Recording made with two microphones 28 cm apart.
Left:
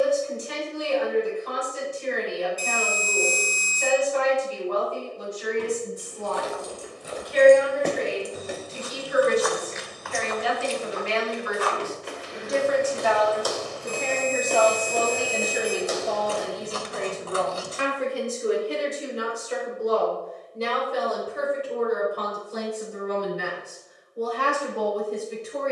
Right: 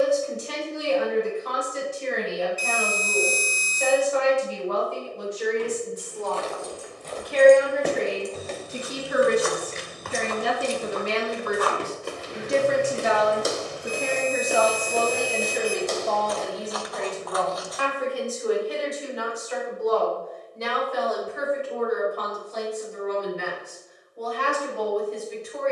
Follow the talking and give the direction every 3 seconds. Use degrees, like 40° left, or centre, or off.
80° right, 80° right, 70° right, 50° right, 20° right, 10° left, 30° left, 40° left, 40° left.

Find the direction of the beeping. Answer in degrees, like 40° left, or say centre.
60° left.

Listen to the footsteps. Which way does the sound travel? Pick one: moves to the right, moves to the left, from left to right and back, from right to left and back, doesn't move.
from left to right and back.